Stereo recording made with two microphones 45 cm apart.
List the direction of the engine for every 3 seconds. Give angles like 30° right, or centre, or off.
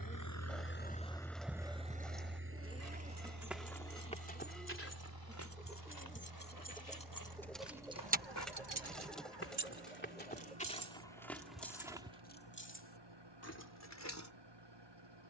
centre, 50° right, 60° right, 60° right, 60° right.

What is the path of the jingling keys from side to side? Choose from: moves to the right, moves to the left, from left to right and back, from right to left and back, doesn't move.
from left to right and back.